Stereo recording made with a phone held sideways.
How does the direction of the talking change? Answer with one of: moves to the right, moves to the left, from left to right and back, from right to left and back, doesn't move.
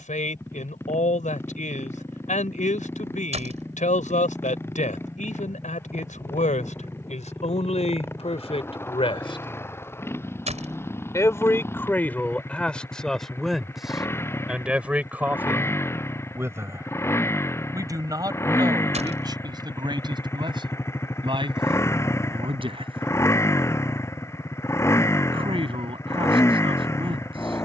moves to the right.